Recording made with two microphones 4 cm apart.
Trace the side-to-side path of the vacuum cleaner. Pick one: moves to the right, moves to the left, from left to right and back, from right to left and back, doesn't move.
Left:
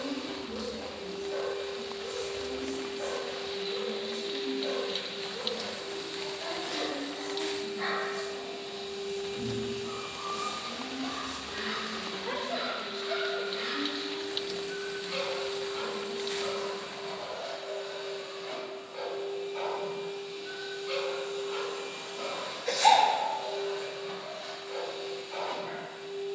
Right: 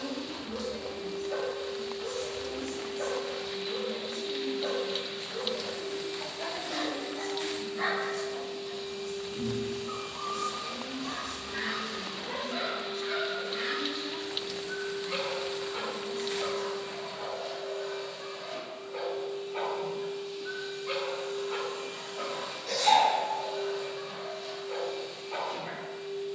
doesn't move.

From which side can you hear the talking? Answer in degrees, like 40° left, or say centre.
60° right.